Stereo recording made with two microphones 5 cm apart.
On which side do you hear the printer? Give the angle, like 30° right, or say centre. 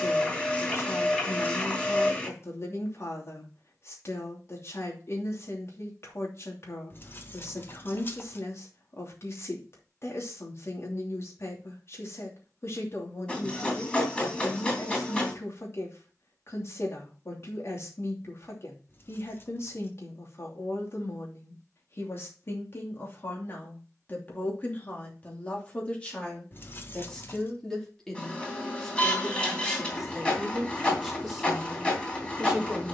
20° left.